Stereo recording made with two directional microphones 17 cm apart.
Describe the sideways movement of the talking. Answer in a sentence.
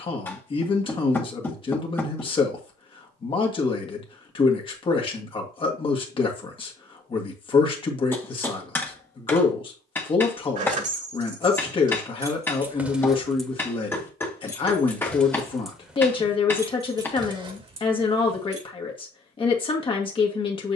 In this clip you hear the talking stay put.